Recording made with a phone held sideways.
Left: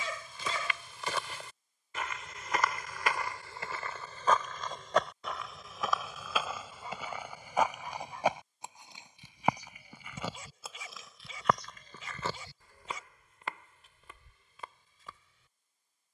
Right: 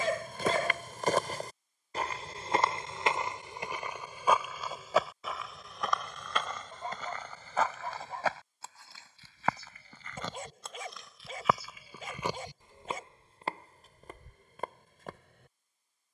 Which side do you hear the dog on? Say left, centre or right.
right.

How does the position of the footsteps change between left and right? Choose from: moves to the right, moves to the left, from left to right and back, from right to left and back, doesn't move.
from right to left and back.